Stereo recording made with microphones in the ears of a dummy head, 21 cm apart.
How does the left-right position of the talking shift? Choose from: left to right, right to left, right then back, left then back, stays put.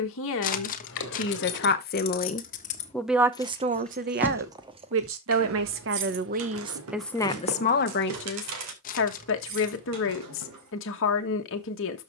right then back.